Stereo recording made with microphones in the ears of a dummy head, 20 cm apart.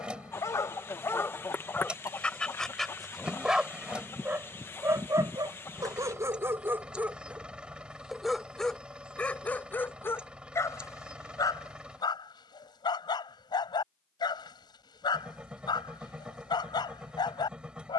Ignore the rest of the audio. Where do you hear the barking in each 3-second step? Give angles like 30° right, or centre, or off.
10° left, 10° right, 10° right, 10° left, 20° left, 20° left.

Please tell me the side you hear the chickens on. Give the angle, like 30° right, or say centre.
10° left.